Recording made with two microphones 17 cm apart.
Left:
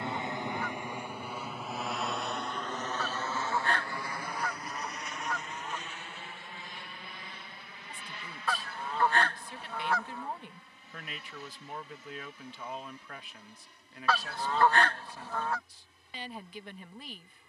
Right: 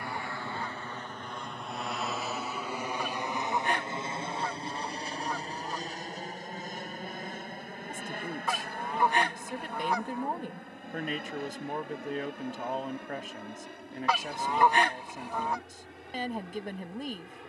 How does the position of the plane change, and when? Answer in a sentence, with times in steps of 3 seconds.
In this clip you hear the plane in the centre from 0 s and on the right from 3 s.